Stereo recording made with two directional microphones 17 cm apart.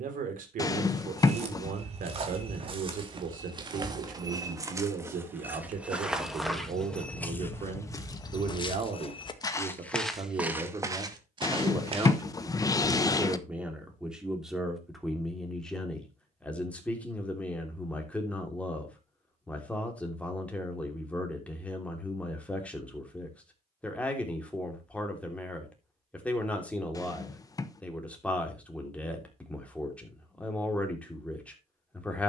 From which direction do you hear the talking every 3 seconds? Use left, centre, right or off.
right, right, right, right, centre, centre, centre, centre, centre, centre, centre.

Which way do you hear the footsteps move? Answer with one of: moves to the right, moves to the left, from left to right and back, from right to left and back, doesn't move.
from right to left and back.